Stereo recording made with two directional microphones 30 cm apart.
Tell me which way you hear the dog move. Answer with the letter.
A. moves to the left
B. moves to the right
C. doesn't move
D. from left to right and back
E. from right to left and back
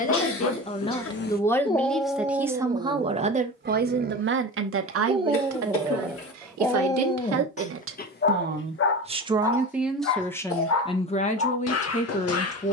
D.